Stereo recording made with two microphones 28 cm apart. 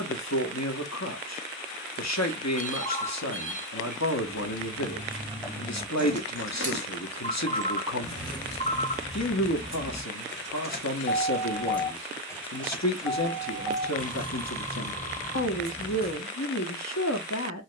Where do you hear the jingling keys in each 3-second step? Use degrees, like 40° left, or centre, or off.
off, 10° right, 50° left, 40° left, 10° right, 30° right.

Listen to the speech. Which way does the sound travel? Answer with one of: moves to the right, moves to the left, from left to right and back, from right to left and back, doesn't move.
doesn't move.